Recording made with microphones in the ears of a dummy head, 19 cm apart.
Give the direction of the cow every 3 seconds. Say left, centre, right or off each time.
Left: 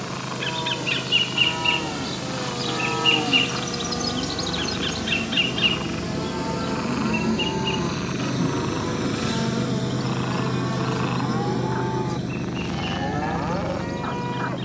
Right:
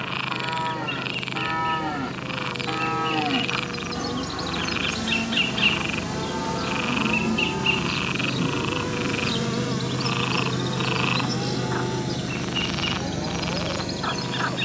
right, right, centre, left, left.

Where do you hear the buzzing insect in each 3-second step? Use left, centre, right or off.
left, centre, right, right, right.